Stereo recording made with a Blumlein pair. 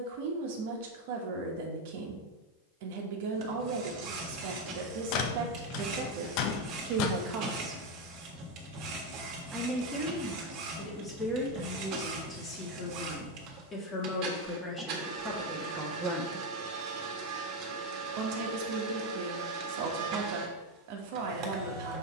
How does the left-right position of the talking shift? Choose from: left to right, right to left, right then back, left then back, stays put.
left then back.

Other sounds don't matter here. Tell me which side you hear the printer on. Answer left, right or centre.
right.